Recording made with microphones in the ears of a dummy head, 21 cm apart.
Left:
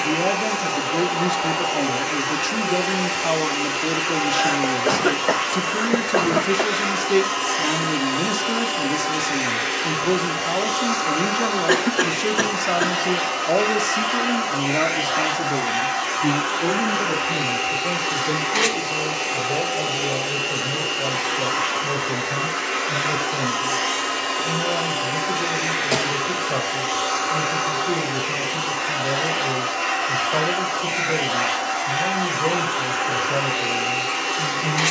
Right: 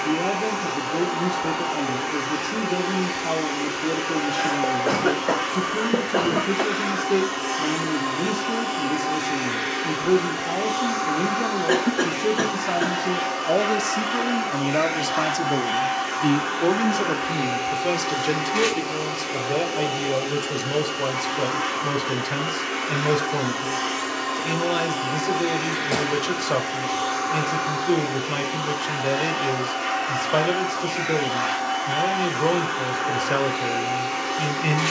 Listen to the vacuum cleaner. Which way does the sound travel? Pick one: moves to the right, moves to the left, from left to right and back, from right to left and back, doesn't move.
doesn't move.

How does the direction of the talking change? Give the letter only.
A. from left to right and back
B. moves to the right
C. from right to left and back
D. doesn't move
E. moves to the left
B.